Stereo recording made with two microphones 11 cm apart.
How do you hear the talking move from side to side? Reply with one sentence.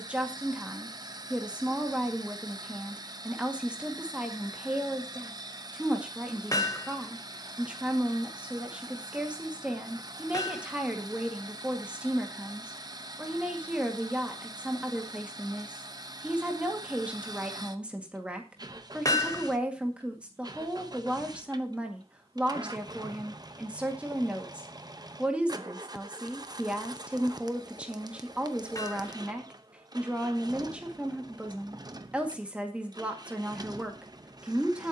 In this clip you hear the talking stay in one place.